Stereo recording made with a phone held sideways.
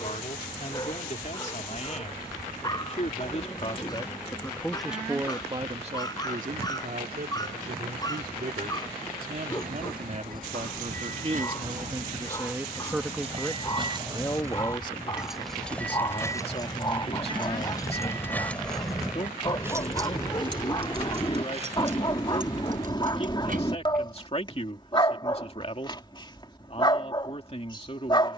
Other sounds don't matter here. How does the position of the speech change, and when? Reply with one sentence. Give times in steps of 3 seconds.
You can hear the speech on the left from 0 s, in the centre from 3 s, on the right from 6 s, in the centre from 12 s and on the left from 15 s.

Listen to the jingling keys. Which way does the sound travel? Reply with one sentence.
In this clip you hear the jingling keys go left and come back.